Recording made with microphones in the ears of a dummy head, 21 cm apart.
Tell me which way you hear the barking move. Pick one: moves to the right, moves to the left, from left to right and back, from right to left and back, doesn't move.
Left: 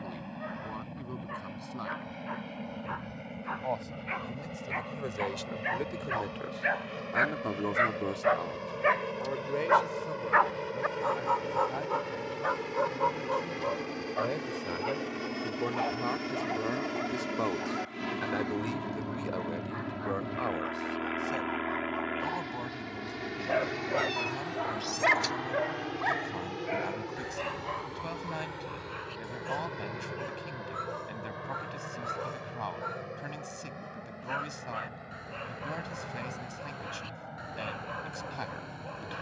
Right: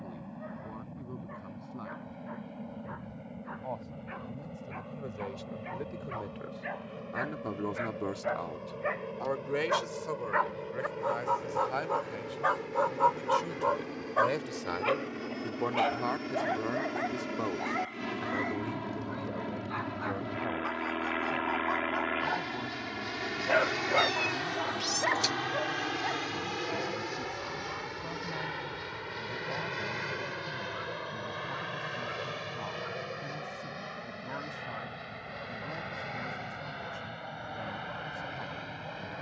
from left to right and back.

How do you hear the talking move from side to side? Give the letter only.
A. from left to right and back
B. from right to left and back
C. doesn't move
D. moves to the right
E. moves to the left
A.